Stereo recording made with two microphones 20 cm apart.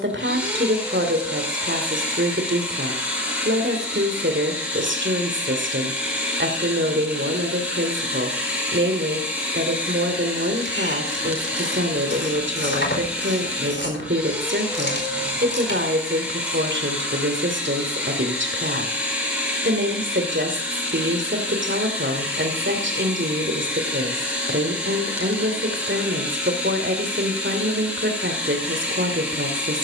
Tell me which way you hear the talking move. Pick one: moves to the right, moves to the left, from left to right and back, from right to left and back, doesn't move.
doesn't move.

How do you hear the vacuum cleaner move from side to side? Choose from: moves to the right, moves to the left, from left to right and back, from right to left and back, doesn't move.
doesn't move.